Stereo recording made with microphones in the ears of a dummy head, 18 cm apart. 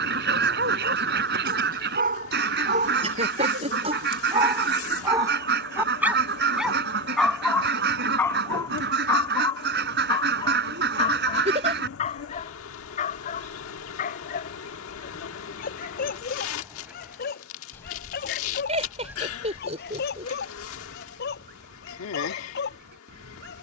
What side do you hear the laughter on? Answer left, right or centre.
right.